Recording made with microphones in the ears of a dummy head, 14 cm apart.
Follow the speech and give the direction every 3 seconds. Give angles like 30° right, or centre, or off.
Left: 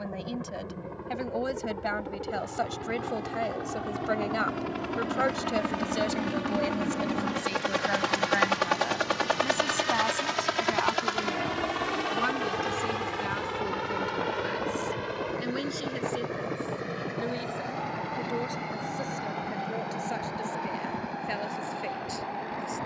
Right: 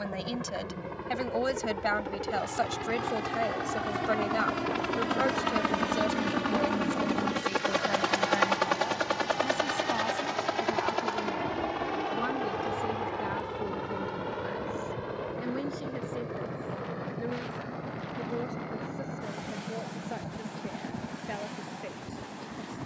30° right, centre, 30° left, 50° left, 60° left, 70° left, 70° left, 70° left.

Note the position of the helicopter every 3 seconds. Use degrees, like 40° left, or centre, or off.
60° right, 40° right, 10° right, 30° left, 50° left, 60° left, 60° left, 70° left.